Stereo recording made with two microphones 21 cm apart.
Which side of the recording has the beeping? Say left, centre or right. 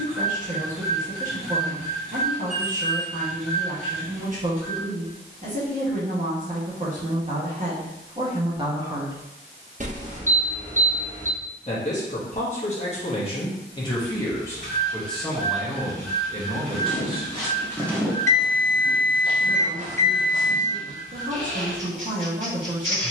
right.